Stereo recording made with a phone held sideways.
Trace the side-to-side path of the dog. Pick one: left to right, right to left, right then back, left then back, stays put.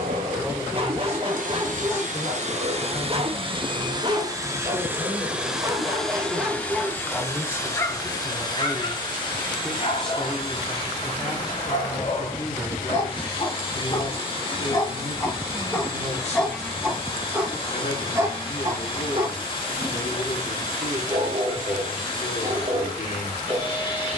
left then back.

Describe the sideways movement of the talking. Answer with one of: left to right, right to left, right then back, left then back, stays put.
right to left.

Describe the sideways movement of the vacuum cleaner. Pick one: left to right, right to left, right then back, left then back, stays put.
right to left.